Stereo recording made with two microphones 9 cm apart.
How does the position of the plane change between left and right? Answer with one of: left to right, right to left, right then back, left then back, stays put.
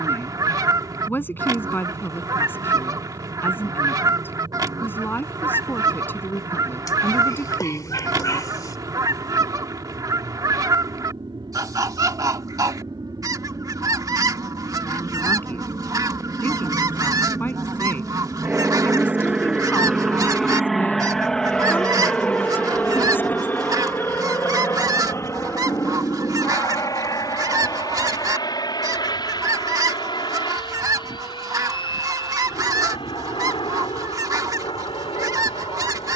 right to left.